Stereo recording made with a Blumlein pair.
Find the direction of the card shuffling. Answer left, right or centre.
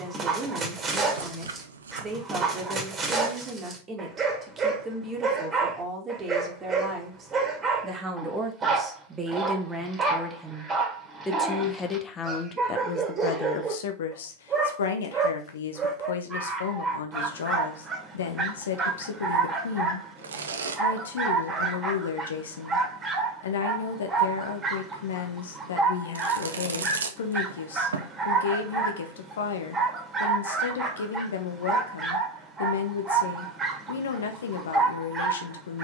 right.